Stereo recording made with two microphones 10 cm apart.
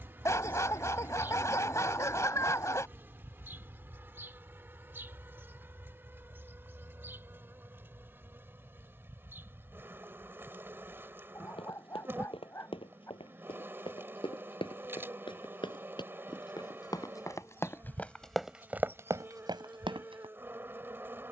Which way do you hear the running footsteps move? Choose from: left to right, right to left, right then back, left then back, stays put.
left to right.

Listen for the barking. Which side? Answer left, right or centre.
left.